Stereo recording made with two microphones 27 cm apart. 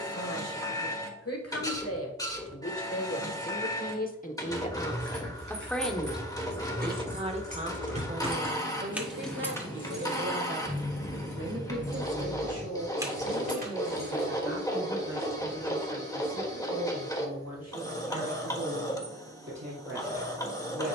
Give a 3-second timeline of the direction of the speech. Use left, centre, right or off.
left, left, right, right, right, right, right.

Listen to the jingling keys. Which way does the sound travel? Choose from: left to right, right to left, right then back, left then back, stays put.
left then back.